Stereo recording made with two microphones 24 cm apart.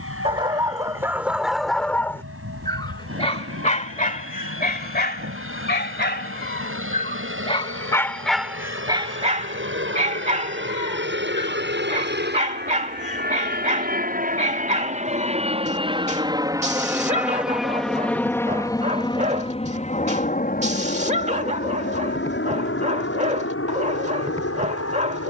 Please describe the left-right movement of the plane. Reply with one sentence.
In this clip you hear the plane go from the right side to the left.